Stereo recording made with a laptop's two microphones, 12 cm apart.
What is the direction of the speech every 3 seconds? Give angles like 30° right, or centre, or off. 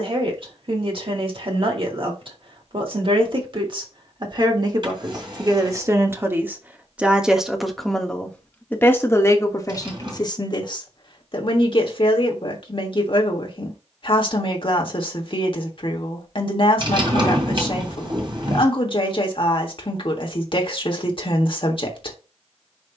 50° right, 40° right, centre, 40° left, 50° left, 50° left, 50° left, 50° left.